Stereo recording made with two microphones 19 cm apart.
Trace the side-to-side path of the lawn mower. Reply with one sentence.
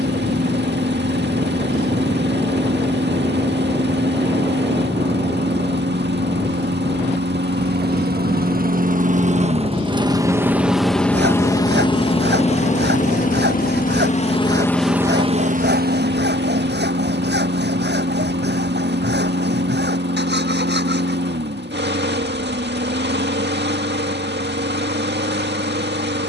In this clip you hear the lawn mower go left and come back.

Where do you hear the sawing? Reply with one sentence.
You can hear the sawing on the right.